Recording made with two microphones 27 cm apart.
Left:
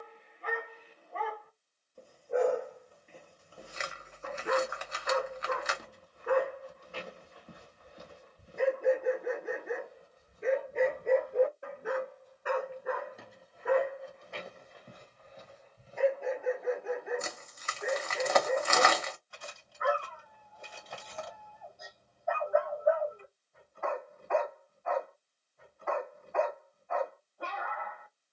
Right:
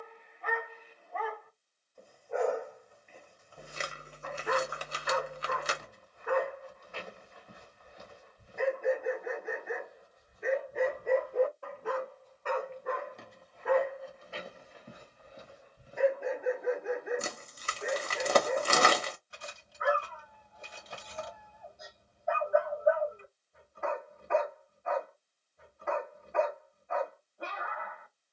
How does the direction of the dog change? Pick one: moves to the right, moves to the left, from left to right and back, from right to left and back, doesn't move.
moves to the right.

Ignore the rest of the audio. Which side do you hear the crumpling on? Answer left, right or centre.
right.